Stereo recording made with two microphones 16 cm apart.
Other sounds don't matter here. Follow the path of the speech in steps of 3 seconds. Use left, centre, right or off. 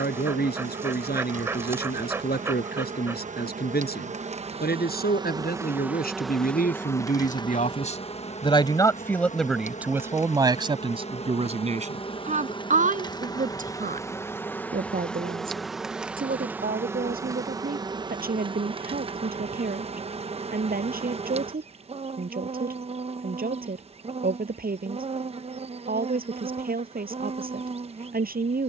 left, left, left, right, right, right, right, right, right, right.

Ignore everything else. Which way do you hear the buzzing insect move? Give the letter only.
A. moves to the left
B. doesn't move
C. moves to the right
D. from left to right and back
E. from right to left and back
E.